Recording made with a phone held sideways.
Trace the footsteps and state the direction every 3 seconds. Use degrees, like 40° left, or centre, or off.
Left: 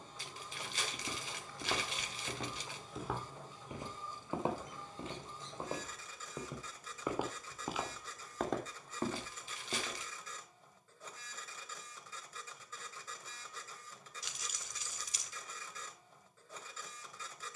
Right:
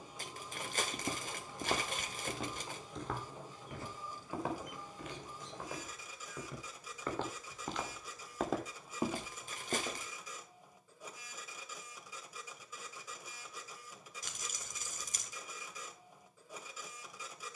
20° right, 20° left, 10° left, 20° right, off, off.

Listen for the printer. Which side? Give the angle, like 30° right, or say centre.
10° right.